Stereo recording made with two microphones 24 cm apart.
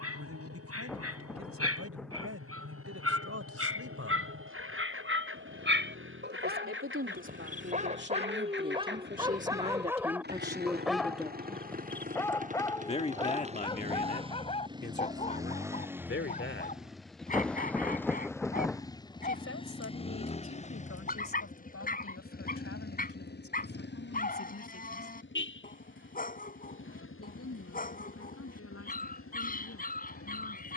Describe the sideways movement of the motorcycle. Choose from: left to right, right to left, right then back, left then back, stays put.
right to left.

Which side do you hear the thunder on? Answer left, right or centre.
centre.